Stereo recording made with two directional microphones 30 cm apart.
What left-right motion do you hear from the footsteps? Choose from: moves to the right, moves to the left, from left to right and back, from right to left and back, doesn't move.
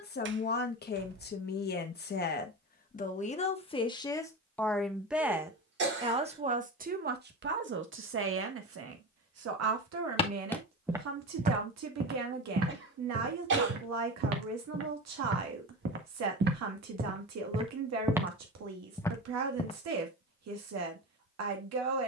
from left to right and back.